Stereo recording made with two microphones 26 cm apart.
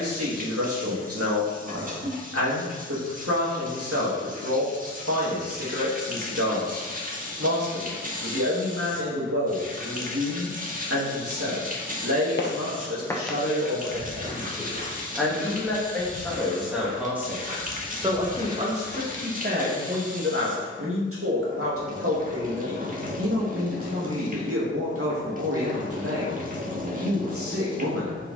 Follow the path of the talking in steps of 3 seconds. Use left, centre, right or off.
right, right, right, right, right, centre, right, right, right, right.